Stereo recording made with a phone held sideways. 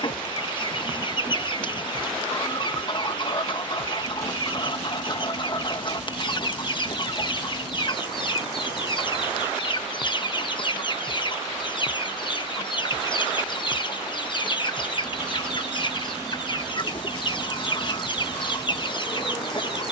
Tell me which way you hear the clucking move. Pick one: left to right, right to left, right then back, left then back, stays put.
stays put.